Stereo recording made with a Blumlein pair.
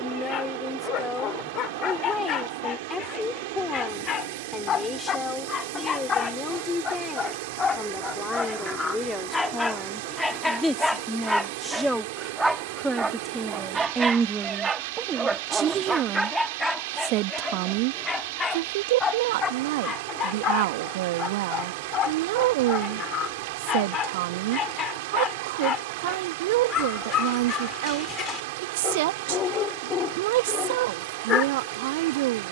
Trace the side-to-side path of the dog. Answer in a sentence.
You can hear the dog move from left to right and back again.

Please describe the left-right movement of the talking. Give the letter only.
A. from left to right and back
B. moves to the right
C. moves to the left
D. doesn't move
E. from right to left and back
B.